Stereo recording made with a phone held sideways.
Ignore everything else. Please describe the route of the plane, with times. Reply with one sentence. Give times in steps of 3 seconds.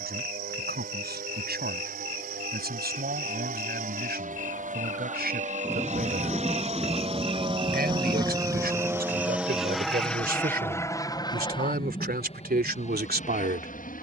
You can hear the plane on the right from 0 s, in the centre from 9 s and on the left from 12 s.